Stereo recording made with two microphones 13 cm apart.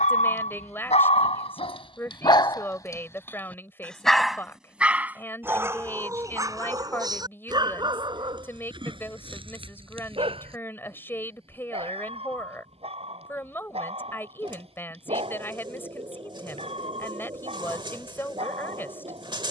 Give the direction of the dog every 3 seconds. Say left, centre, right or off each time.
left, centre, right, right, right, right, right.